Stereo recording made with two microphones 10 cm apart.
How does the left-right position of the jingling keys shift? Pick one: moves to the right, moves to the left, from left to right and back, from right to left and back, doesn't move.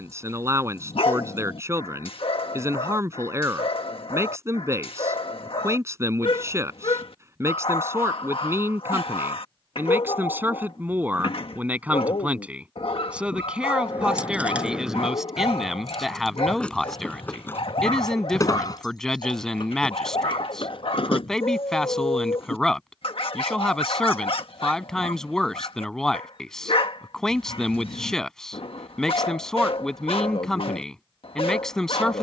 moves to the left.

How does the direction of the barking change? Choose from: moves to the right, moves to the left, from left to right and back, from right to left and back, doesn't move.
doesn't move.